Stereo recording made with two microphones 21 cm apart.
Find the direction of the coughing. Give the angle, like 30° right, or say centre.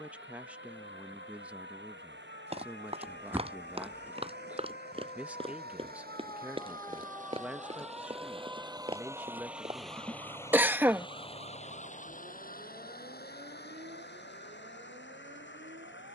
10° right.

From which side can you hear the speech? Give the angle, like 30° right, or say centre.
10° right.